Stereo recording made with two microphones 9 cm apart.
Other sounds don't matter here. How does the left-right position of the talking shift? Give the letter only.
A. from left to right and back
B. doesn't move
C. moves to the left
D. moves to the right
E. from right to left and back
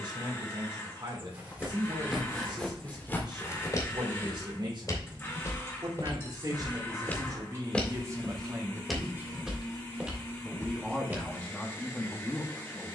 C.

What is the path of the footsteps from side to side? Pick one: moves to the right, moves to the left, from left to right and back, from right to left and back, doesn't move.
from right to left and back.